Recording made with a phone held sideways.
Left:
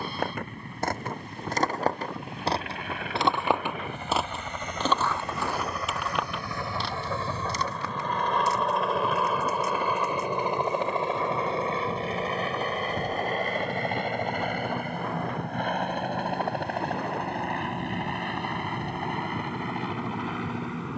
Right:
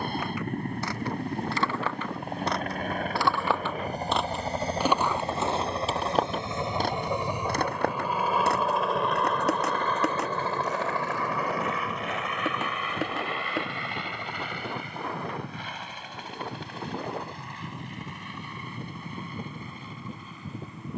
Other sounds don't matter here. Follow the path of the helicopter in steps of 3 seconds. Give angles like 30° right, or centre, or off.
50° right, 40° right, 10° right, 20° left, 40° left, 50° left, 60° left.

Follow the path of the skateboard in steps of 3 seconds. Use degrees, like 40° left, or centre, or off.
40° left, 10° right, 50° right, 70° right, 80° right, off, off.